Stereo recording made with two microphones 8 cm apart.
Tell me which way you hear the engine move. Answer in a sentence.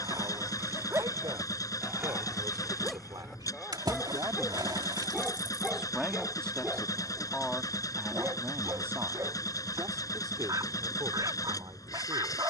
In this clip you hear the engine stay in one place.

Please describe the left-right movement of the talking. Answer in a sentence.
In this clip you hear the talking go left and come back.